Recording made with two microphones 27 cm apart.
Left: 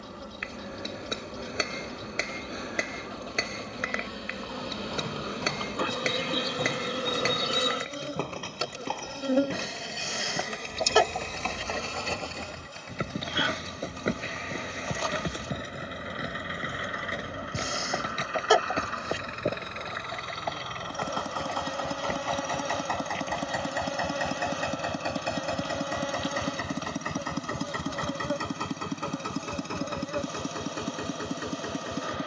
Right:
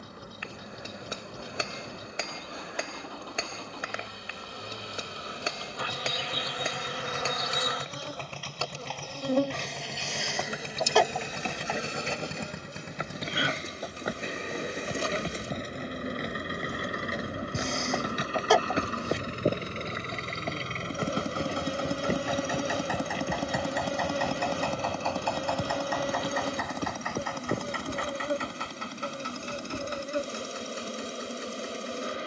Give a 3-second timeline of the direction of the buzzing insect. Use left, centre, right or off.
left, left, left, centre, right, right, right, right, right, right, right.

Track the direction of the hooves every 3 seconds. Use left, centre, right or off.
off, left, left, left, left, centre, right, right, right, right, off.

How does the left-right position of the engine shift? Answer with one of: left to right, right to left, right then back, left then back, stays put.
right to left.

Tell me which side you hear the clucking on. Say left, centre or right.
centre.